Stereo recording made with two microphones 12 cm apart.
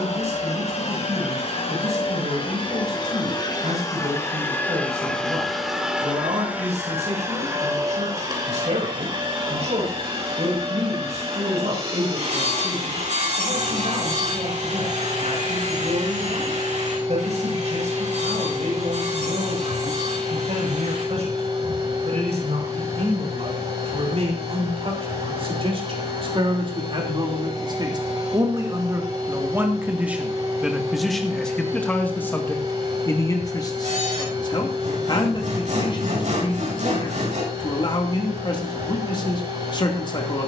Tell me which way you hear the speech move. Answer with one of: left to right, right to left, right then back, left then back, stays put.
right to left.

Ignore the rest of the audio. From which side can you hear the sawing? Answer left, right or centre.
right.